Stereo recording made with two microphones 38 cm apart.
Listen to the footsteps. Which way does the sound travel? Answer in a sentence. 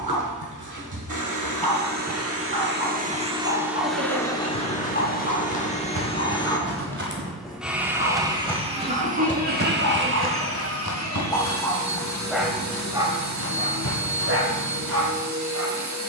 In this clip you hear the footsteps move to the left.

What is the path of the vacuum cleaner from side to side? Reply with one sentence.
You can hear the vacuum cleaner move from right to left and back again.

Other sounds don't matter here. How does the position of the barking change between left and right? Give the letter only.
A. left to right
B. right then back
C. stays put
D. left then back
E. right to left
D.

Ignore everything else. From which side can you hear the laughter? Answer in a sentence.
In this clip you hear the laughter on the right.